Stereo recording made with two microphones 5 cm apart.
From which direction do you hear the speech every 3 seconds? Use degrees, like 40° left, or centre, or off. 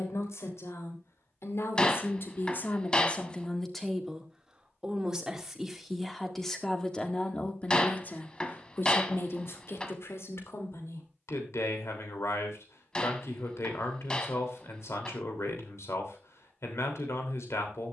60° left, centre, 30° left, 70° left, 80° left, 80° left.